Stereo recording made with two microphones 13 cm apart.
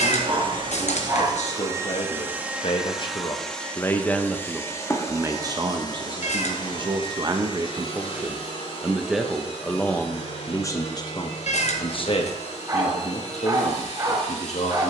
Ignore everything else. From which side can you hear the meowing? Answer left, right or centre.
left.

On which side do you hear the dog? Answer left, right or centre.
right.